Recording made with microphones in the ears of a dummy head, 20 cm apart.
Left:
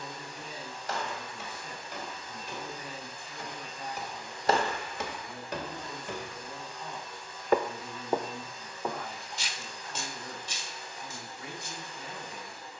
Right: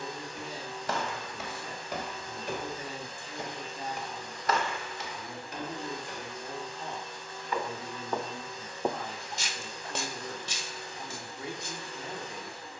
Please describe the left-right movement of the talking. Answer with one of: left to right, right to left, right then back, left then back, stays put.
stays put.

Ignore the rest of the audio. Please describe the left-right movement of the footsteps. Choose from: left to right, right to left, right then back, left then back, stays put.
left then back.